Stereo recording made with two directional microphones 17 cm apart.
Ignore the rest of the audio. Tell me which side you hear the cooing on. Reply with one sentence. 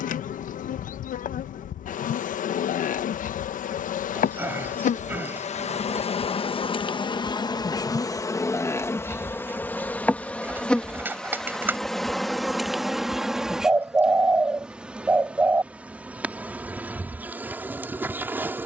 In this clip you hear the cooing in the centre.